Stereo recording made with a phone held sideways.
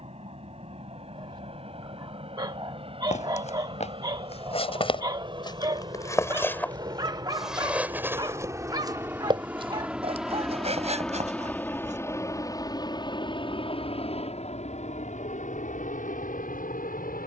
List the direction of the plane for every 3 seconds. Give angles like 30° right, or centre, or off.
50° right, 40° right, 30° right, centre, 40° left, 60° left.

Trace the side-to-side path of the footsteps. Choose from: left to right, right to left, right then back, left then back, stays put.
left to right.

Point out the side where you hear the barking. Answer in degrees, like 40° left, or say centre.
30° right.